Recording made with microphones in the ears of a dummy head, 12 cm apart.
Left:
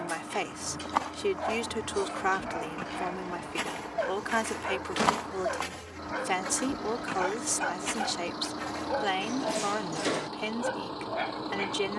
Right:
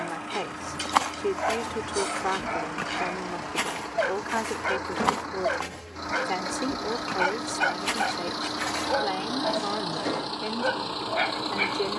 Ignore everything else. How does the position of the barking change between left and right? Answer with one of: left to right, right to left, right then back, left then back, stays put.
stays put.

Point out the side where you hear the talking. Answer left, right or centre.
left.